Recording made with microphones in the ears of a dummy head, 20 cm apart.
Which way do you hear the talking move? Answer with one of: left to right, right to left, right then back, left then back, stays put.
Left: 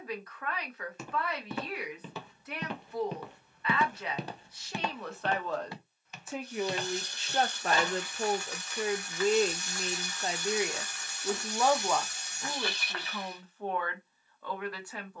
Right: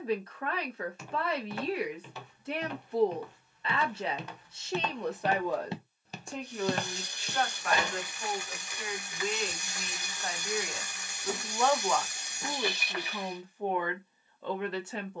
left then back.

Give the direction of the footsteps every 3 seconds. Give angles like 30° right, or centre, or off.
70° left, 20° left, 40° right, off, off.